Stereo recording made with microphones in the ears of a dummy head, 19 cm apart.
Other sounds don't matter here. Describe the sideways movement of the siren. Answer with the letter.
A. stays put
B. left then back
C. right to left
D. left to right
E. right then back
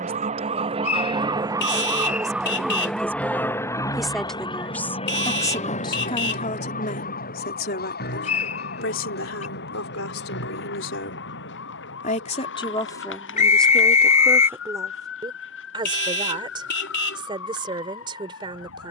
C.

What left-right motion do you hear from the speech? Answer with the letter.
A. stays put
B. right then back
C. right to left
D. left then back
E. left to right
D.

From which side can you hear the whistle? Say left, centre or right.
left.